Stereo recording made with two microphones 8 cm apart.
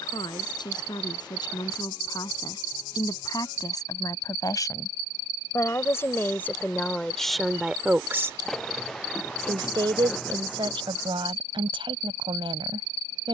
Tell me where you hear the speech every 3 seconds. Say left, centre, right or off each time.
left, left, centre, right, right.